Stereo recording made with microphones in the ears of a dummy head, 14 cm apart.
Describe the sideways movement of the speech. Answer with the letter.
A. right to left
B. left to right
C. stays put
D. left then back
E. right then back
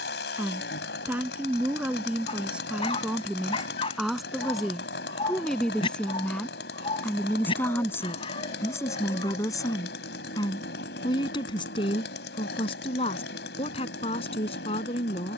A.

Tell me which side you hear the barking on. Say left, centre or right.
left.